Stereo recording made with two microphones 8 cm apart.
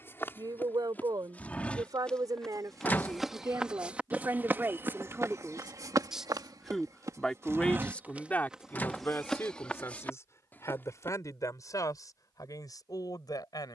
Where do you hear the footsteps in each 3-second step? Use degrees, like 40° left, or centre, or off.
20° left, 30° right, 30° right, 10° left, off.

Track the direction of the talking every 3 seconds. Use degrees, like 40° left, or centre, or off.
50° right, 30° right, 10° left, 40° left, 50° left.